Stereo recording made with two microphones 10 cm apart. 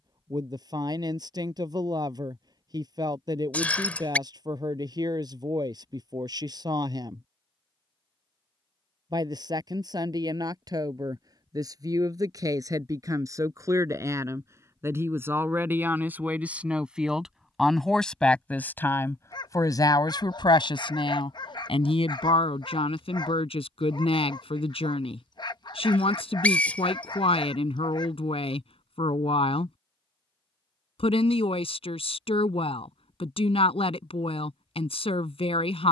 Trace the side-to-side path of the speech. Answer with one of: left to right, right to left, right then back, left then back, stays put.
right to left.